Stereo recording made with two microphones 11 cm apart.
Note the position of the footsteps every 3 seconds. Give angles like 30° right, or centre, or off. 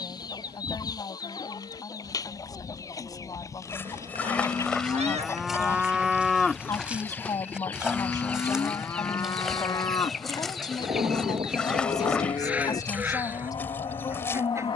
off, 10° left, 10° right, centre, 20° left.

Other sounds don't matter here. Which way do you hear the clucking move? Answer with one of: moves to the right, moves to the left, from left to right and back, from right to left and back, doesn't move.
moves to the right.